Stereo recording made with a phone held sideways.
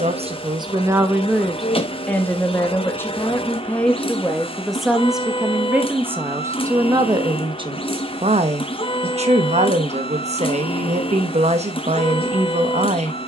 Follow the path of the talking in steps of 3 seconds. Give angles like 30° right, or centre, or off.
10° right, centre, 30° right, 40° right, 40° right.